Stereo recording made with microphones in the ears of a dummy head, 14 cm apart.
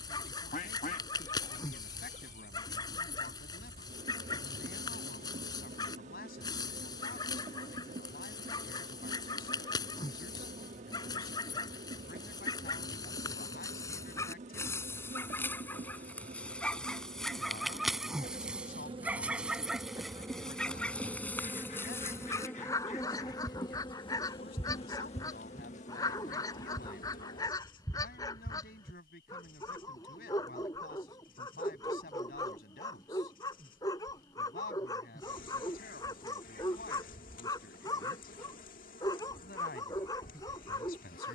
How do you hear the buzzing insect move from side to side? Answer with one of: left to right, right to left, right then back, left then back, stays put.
right to left.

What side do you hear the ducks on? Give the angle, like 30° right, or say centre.
50° left.